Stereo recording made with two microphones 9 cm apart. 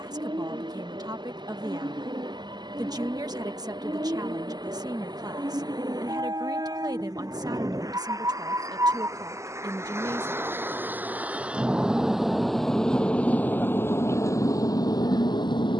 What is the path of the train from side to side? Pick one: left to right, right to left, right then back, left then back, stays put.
right to left.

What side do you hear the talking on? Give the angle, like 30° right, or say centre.
40° right.